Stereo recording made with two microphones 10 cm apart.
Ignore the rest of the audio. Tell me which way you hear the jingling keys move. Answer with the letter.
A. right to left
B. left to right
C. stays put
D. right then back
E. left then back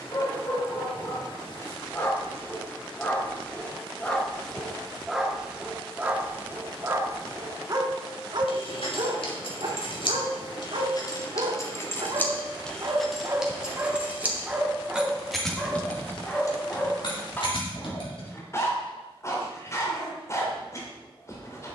D.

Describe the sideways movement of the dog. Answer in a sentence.
You can hear the dog go right and come back.